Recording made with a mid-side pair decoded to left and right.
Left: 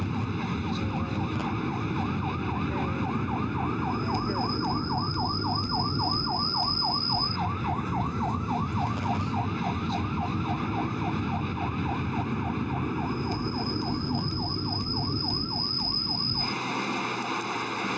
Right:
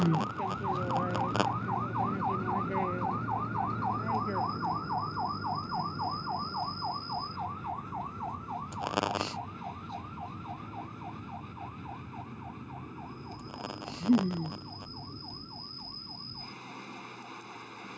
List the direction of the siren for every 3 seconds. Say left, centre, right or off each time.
right, centre, left, left, left, left.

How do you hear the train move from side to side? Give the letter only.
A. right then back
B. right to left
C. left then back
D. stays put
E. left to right
D.